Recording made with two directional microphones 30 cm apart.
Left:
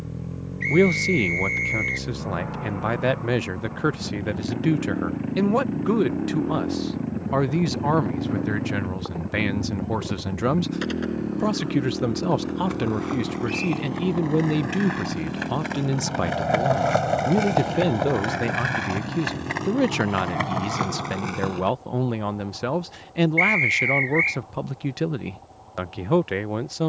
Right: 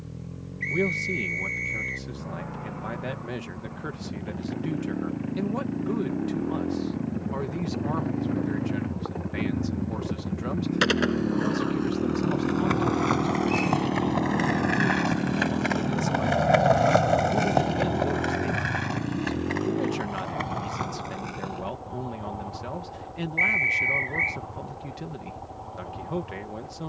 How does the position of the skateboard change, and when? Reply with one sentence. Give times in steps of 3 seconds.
You can hear the skateboard not at all from 0 s, on the right from 9 s, in the centre from 15 s, on the left from 18 s and not at all from 24 s.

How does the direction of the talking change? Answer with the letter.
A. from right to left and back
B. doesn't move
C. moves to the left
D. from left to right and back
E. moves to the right
B.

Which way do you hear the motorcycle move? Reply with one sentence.
In this clip you hear the motorcycle move from left to right.